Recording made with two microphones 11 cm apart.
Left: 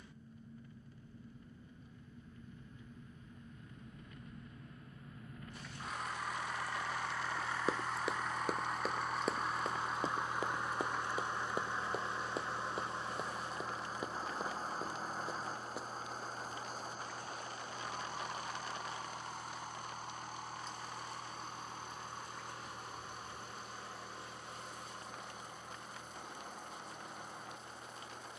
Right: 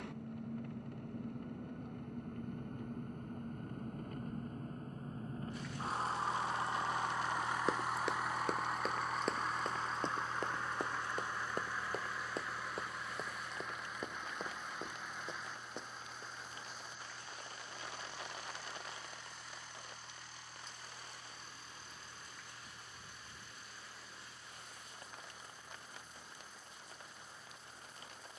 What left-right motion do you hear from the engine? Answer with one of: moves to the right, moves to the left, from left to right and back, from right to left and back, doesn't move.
moves to the left.